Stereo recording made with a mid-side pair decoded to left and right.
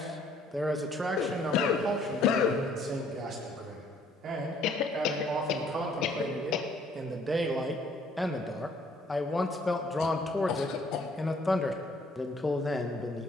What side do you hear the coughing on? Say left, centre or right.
left.